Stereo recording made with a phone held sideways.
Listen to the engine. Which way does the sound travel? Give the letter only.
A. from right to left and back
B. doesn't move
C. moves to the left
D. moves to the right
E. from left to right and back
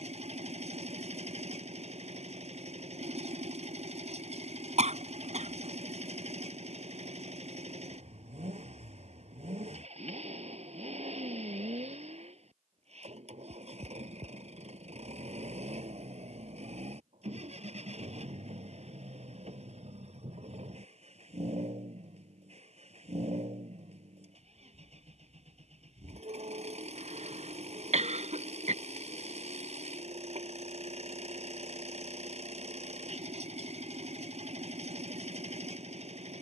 B.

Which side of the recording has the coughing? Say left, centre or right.
right.